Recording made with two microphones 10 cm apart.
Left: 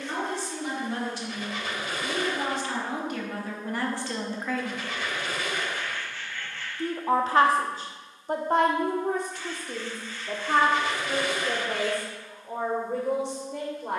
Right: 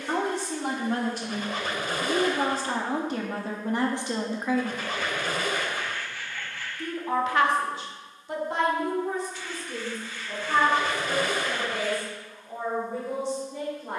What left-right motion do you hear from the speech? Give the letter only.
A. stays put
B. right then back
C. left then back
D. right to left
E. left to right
D.